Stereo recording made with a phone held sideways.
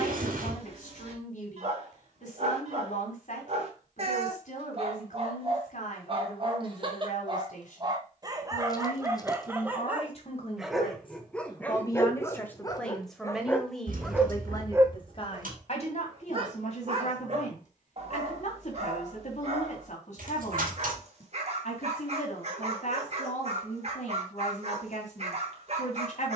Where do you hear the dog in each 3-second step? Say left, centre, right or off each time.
right, right, right, centre, centre, right, right, right, right.